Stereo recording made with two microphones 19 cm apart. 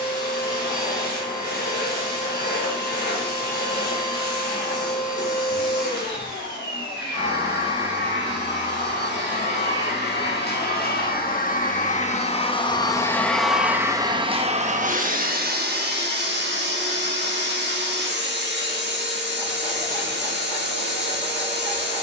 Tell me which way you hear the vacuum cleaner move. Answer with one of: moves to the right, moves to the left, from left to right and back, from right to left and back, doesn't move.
moves to the right.